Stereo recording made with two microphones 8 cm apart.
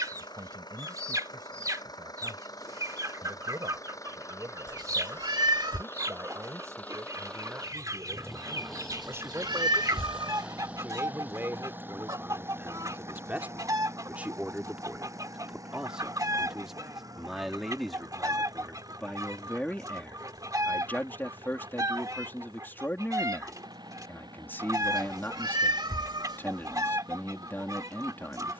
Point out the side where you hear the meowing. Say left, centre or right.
right.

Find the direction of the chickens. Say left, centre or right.
right.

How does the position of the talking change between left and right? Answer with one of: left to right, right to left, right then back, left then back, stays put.
right to left.